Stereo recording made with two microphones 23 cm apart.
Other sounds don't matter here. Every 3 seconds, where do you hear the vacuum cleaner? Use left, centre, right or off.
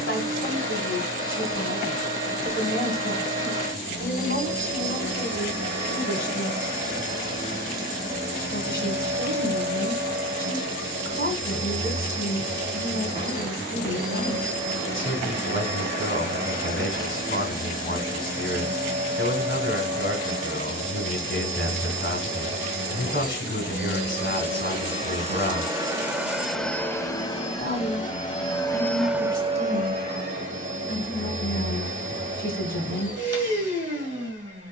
right, right, right, right, right, right, right, right, right, centre, right, right.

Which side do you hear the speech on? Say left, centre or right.
left.